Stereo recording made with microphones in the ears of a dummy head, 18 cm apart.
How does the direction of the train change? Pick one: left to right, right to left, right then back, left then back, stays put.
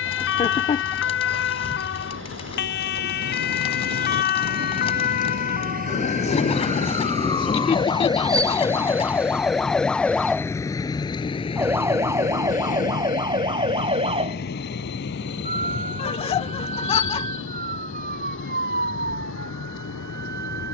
right to left.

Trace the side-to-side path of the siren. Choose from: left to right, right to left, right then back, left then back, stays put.
left to right.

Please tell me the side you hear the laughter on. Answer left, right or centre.
left.